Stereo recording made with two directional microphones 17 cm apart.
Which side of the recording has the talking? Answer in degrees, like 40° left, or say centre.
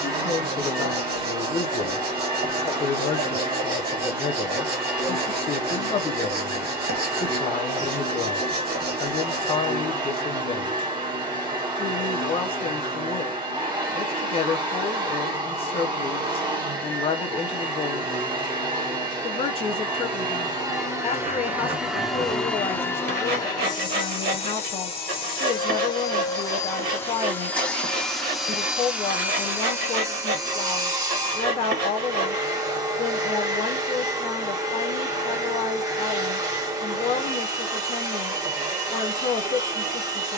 30° left.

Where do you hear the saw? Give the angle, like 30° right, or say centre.
60° right.